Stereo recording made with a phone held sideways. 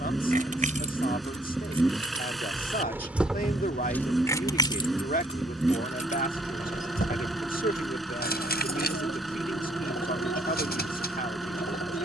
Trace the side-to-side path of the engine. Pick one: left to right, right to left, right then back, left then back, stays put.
stays put.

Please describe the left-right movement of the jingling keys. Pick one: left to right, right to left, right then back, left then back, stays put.
right to left.